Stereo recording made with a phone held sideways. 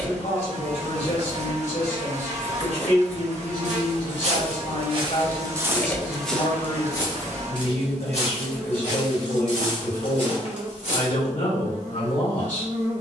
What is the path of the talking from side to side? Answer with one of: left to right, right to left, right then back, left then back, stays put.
stays put.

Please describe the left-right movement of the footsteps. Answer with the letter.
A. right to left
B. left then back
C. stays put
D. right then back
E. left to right
A.